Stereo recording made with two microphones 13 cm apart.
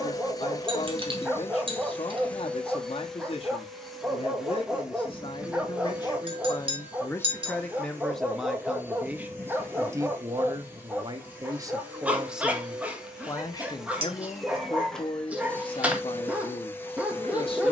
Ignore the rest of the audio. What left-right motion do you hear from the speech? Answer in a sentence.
You can hear the speech move from left to right and back again.